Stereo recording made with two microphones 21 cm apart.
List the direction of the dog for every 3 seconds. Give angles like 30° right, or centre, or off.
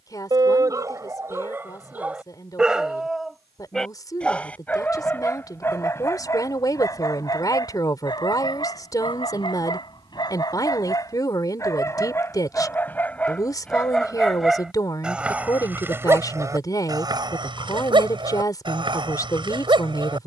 10° right, 10° left, 20° left, 20° left, 10° left, 10° right, 20° right.